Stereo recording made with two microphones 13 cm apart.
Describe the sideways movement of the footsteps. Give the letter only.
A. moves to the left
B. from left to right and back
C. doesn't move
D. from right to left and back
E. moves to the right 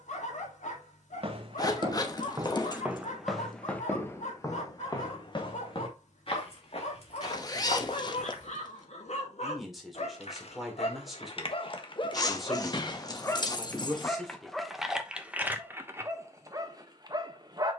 A.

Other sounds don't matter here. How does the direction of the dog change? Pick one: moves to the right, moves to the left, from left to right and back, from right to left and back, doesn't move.
moves to the right.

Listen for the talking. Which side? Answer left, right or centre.
centre.